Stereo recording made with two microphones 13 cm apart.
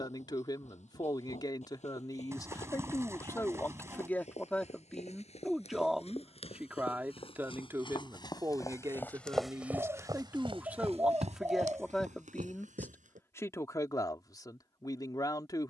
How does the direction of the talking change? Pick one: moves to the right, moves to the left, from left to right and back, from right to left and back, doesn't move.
from left to right and back.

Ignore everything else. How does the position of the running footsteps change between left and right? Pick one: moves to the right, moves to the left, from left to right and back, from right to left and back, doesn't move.
moves to the right.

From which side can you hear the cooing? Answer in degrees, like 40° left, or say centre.
20° right.